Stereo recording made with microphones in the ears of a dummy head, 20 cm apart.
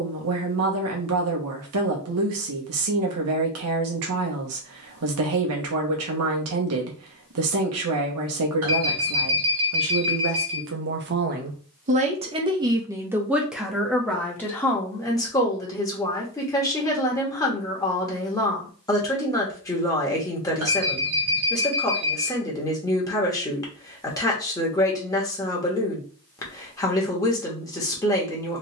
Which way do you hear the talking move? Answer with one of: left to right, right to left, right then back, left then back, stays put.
right to left.